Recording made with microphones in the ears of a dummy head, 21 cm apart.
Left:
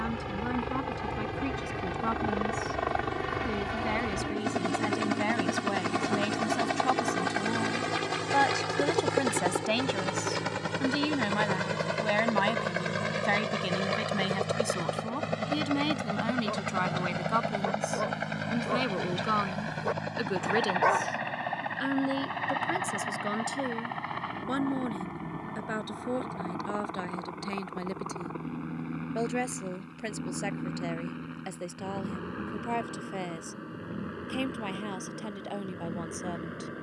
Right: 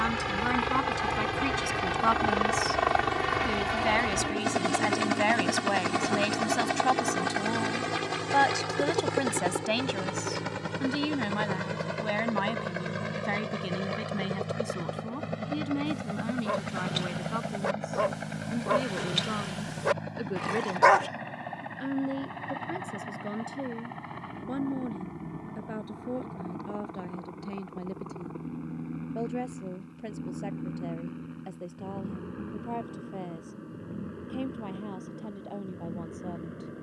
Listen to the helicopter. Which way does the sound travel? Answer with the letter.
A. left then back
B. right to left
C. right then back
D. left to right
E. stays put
B.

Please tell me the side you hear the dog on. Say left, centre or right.
right.